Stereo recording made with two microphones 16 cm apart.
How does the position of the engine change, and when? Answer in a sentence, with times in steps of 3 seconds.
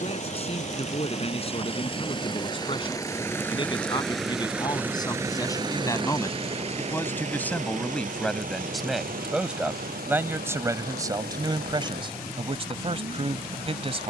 In this clip you hear the engine on the left from 0 s, in the centre from 3 s and on the right from 6 s.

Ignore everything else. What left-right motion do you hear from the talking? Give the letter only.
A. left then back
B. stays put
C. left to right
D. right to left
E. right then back
C.